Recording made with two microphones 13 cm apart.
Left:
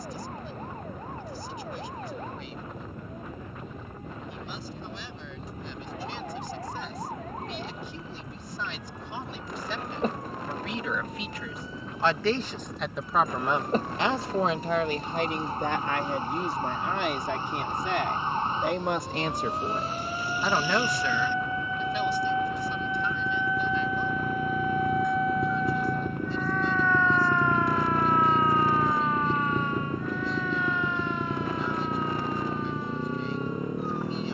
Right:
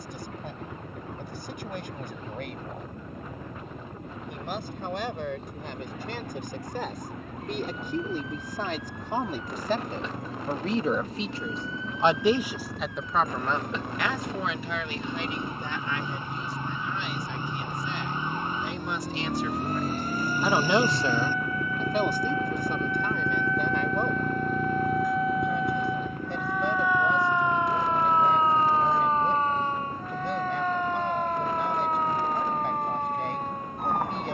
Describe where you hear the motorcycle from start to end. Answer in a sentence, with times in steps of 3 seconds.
You can hear the motorcycle on the right from 0 s, in the centre from 24 s and on the left from 27 s.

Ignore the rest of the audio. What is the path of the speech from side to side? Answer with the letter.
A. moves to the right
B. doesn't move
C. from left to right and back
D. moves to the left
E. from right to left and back
E.